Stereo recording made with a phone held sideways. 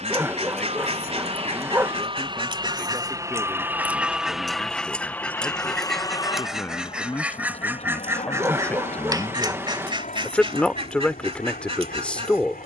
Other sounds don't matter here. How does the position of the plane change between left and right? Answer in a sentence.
You can hear the plane travel towards the left.